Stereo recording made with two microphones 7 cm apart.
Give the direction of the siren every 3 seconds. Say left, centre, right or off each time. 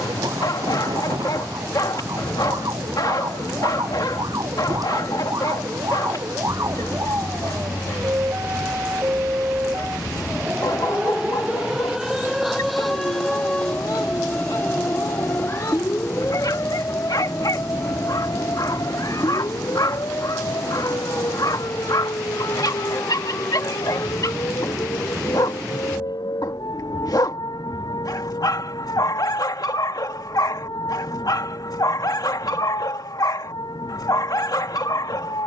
right, right, right, right, centre, left, left, left, left, left, left, left.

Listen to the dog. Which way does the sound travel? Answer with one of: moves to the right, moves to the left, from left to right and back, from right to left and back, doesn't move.
doesn't move.